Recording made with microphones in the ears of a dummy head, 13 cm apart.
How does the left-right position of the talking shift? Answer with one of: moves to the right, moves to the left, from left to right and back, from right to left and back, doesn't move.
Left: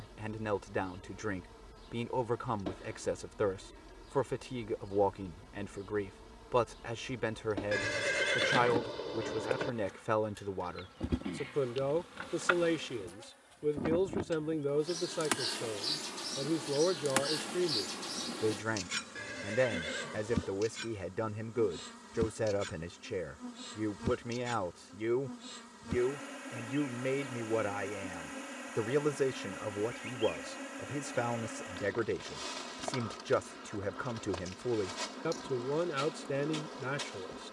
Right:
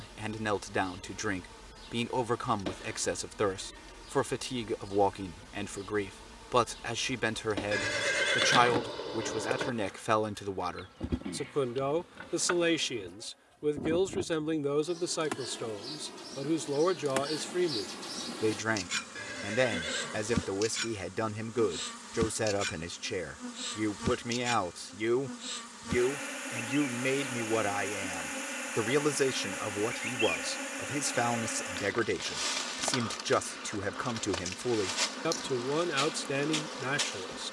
doesn't move.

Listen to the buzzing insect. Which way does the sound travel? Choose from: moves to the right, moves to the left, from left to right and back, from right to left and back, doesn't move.
from right to left and back.